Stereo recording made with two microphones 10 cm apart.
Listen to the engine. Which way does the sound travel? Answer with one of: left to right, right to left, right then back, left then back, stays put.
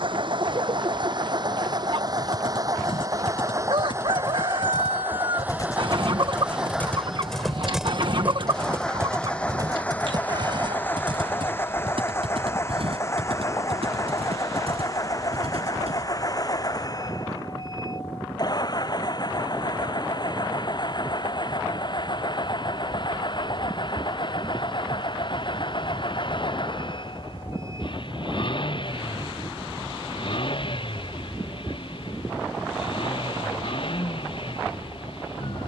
right to left.